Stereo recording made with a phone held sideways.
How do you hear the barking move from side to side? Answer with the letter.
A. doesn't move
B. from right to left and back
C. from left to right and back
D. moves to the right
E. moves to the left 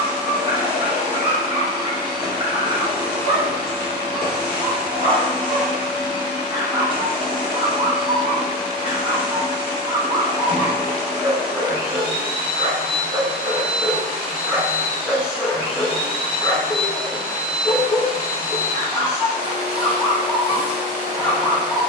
E.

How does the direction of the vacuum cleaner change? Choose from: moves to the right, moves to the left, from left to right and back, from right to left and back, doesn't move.
doesn't move.